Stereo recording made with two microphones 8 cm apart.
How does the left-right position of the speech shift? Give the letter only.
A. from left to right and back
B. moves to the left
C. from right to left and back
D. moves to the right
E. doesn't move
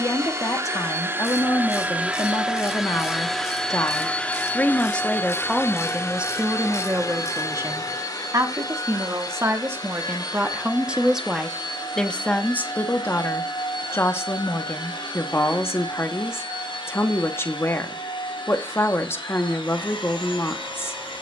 A.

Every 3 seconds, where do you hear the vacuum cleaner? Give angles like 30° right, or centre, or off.
20° right, 20° left, 40° left, 60° left, 60° left, 70° left, 70° left.